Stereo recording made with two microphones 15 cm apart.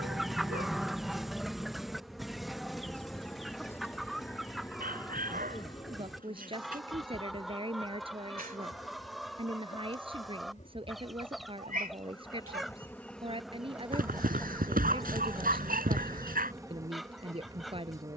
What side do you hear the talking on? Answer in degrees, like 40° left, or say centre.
40° right.